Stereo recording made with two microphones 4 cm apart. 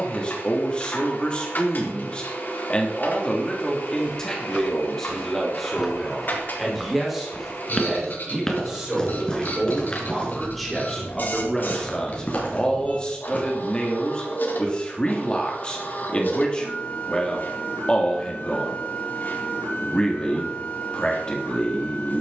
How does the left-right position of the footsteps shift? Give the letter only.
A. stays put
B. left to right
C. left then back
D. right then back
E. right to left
E.